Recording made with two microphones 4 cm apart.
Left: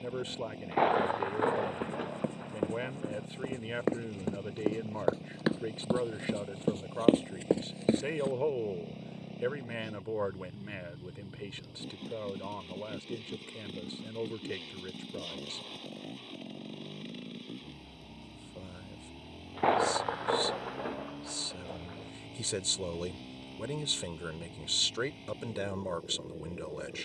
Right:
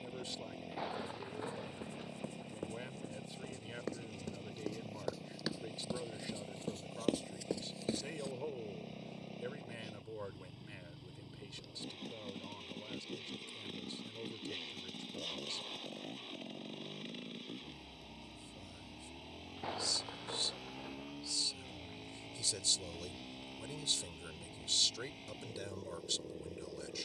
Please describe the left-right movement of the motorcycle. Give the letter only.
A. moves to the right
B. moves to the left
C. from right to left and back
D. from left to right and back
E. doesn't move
E.